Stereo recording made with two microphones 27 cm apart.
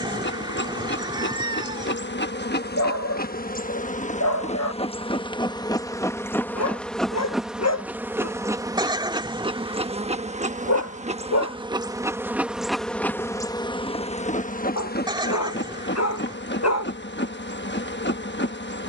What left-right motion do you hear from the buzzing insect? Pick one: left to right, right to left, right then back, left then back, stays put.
right then back.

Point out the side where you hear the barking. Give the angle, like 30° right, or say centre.
70° left.